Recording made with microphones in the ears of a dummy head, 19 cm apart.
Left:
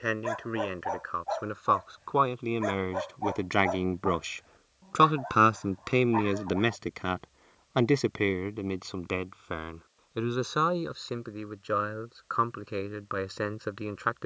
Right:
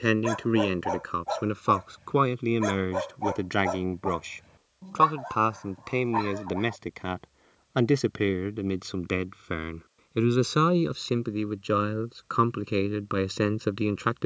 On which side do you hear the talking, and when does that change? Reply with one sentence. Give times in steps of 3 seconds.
You can hear the talking on the right from 0 s, in the centre from 3 s and on the right from 9 s.